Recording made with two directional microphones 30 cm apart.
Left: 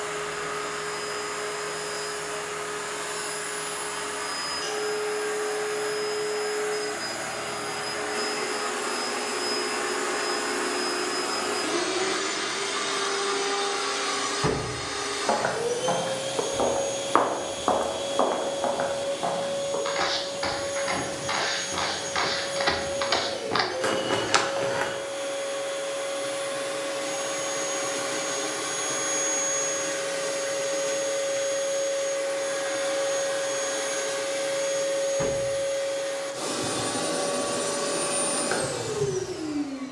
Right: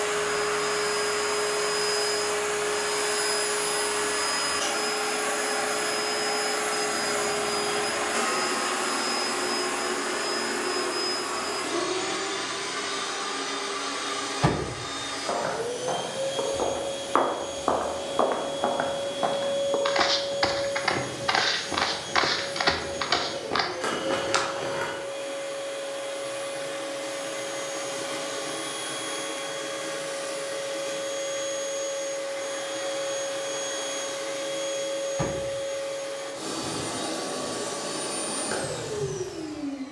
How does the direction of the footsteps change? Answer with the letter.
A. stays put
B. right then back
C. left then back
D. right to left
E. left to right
B.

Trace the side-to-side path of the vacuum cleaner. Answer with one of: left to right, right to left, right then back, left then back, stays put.
right to left.